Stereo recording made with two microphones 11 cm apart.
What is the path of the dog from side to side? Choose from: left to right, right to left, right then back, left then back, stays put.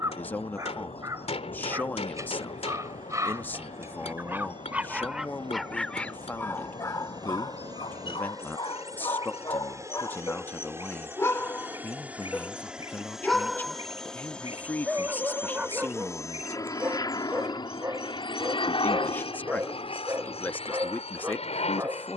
left then back.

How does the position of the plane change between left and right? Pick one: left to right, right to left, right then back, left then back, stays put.
right to left.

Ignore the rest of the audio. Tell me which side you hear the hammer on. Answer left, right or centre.
left.